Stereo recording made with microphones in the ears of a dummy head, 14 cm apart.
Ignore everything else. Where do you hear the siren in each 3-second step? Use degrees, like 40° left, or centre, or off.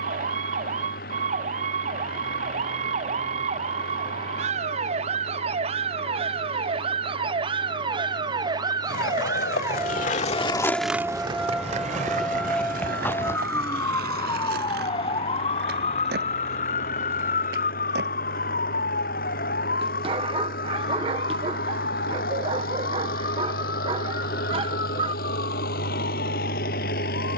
50° right, 50° right, 30° right, 10° right, 20° left, 40° left, 60° left, 70° left, 80° left.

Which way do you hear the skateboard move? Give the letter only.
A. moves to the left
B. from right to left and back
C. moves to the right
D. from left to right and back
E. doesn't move
C.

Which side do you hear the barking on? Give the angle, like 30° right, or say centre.
30° right.